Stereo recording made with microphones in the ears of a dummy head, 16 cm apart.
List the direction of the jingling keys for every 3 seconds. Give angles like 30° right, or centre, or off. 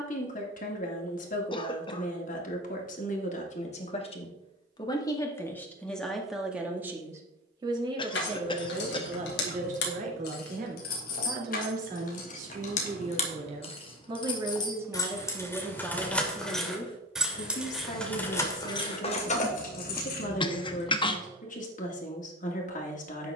off, off, 70° left, 60° left, 40° left, 10° left, 40° left, off.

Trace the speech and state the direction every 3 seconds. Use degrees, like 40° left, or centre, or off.
50° left, 30° left, 20° right, 50° right, 30° right, 20° left, 50° left, 50° left.